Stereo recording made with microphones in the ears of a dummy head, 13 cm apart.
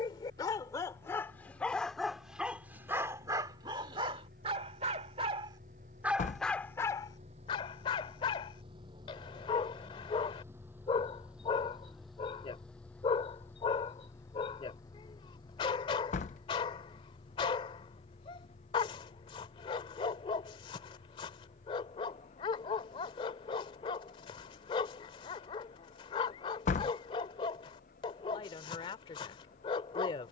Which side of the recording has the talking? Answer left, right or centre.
left.